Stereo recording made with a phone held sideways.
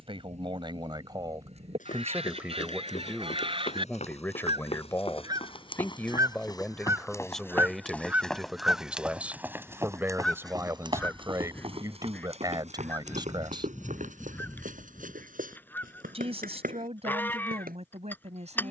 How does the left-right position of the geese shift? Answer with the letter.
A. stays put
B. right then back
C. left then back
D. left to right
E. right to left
E.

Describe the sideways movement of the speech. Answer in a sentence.
You can hear the speech go left and come back.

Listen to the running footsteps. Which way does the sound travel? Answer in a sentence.
You can hear the running footsteps travel towards the right.